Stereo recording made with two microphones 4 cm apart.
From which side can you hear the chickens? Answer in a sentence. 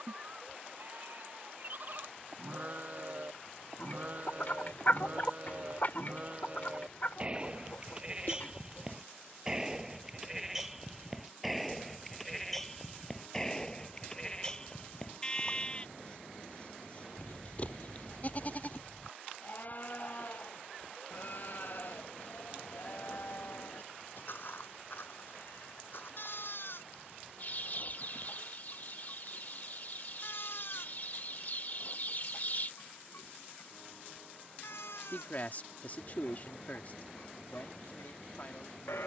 In this clip you hear the chickens on the left.